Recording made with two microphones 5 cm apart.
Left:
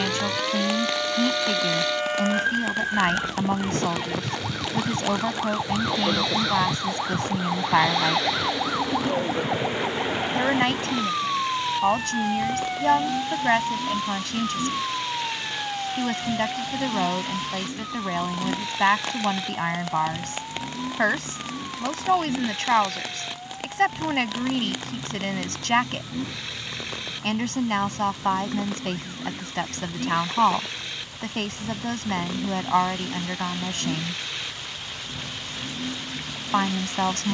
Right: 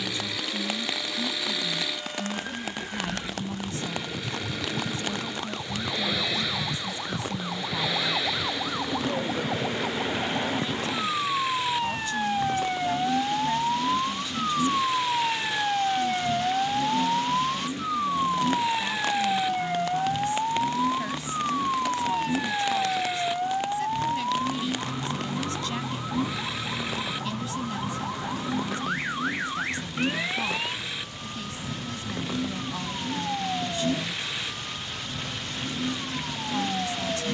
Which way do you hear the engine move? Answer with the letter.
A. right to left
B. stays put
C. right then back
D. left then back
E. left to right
B.